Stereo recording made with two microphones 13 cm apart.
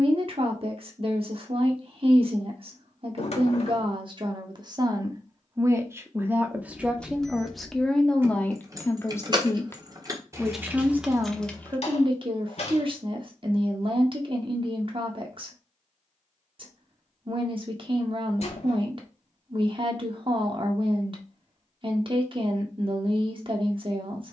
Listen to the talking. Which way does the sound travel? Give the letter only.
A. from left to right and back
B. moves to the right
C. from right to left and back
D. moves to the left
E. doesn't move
C.